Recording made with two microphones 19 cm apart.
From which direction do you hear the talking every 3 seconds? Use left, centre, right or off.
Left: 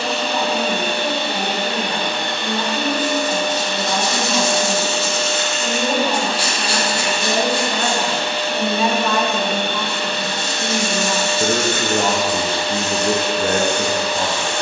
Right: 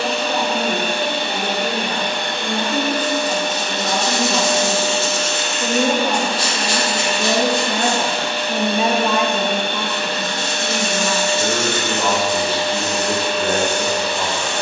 right, right, right, centre, left.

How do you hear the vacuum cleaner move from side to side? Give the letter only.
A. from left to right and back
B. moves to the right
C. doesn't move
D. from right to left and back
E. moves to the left
C.